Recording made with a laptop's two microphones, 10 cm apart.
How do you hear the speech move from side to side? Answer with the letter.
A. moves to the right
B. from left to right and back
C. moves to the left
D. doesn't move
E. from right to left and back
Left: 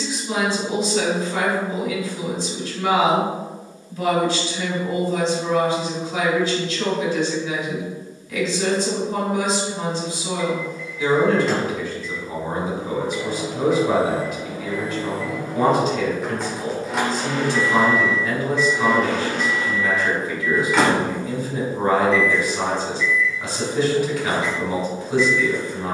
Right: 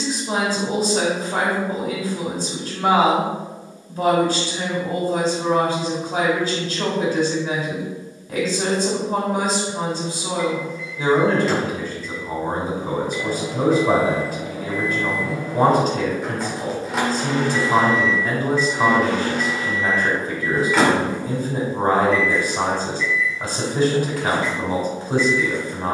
D.